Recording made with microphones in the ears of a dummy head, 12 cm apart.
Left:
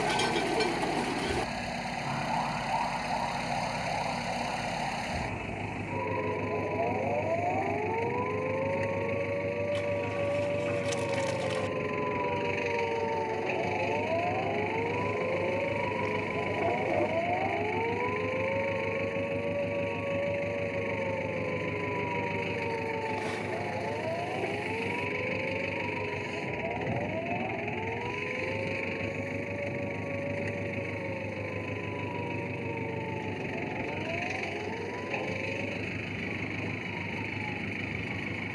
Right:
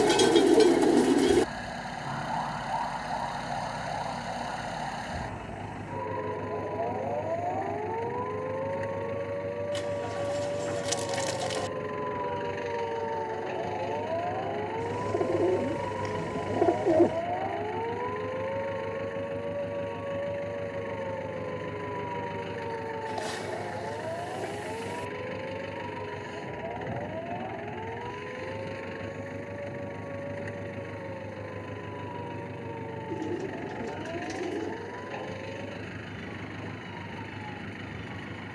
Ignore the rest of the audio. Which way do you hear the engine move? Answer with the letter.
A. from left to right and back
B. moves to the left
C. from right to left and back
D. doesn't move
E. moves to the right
D.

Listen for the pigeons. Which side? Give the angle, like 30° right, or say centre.
50° right.